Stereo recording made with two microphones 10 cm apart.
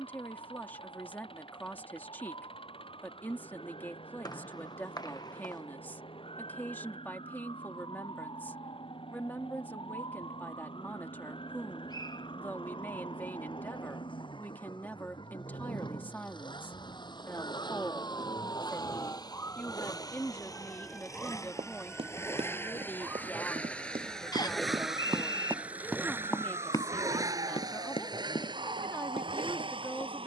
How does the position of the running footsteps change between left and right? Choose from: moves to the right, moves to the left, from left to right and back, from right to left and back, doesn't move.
moves to the left.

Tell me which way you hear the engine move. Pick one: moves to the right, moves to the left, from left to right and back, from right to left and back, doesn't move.
moves to the right.